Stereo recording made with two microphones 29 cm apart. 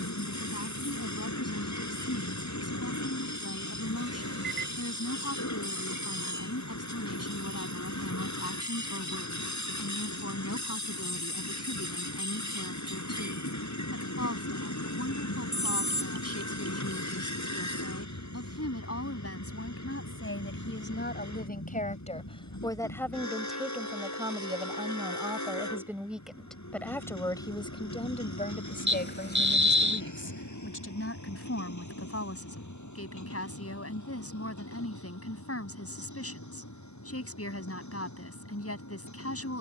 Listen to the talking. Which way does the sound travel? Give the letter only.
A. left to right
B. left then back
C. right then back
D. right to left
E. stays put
C.